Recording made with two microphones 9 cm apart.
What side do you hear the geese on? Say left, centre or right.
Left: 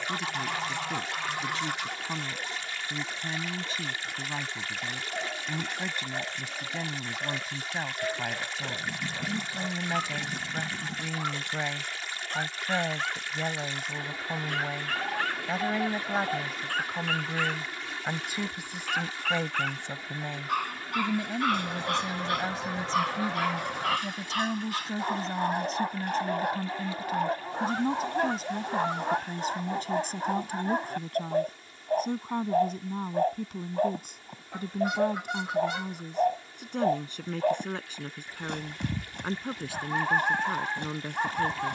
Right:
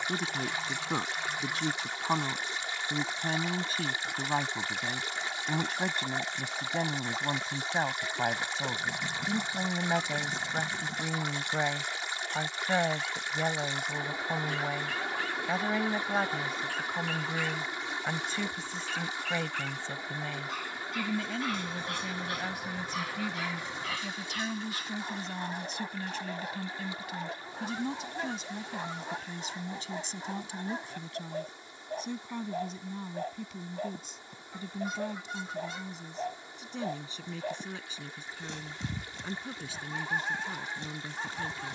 left.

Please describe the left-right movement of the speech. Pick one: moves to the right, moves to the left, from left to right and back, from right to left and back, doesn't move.
moves to the left.